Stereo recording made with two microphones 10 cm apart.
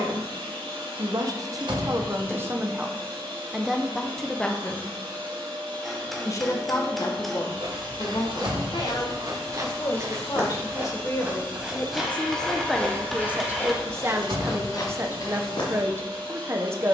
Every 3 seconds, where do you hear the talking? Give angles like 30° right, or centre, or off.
30° right, 10° left, 40° left, 30° left, 10° right, 30° right.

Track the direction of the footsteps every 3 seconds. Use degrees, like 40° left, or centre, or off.
off, off, 50° right, 30° right, 20° left, 50° left.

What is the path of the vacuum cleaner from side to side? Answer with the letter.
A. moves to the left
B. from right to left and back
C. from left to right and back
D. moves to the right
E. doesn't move
E.